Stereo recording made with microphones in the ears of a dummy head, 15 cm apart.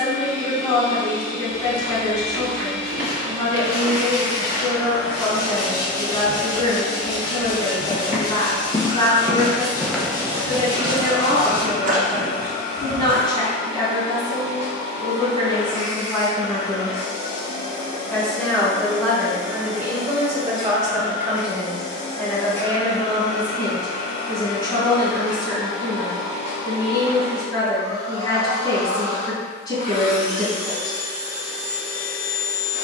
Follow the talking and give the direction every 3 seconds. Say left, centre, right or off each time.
left, left, left, left, left, left, centre, centre, left, left, left.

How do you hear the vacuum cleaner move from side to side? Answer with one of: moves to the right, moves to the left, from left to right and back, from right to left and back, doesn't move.
doesn't move.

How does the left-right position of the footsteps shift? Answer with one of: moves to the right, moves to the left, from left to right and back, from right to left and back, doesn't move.
from right to left and back.